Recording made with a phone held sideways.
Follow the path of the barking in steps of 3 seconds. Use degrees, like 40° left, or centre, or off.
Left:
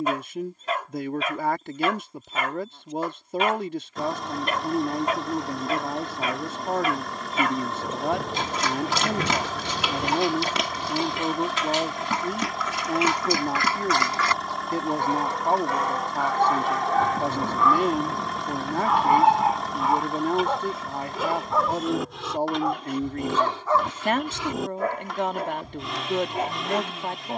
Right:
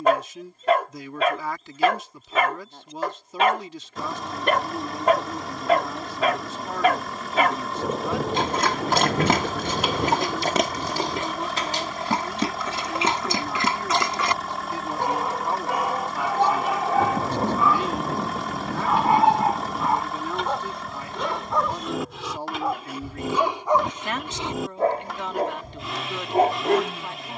60° right, 60° right, 60° right, 40° right, 30° right, 10° right, centre, centre, 40° right.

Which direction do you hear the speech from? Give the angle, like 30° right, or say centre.
50° left.